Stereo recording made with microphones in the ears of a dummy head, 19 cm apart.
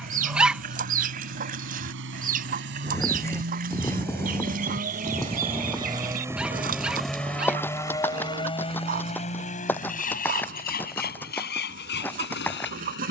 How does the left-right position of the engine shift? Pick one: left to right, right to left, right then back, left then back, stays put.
right to left.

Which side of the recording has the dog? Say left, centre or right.
centre.